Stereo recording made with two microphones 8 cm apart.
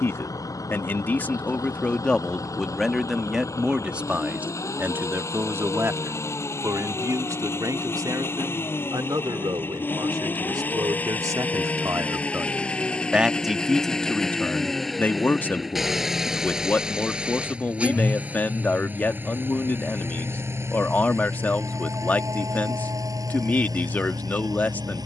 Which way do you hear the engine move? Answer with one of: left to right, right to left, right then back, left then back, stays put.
left to right.